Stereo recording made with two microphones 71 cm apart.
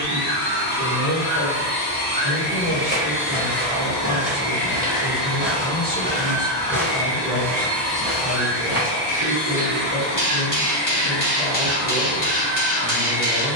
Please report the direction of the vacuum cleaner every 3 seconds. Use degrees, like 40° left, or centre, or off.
30° right, 10° right, centre, 20° right, 30° right.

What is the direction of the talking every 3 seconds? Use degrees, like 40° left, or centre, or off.
30° left, 30° left, centre, 40° right, 40° right.